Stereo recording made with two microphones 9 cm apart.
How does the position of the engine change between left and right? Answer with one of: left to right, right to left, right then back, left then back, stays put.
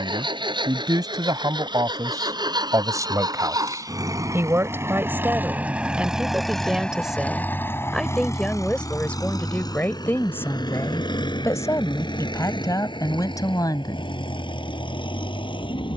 right to left.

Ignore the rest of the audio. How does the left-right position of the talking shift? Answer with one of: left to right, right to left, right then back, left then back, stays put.
right to left.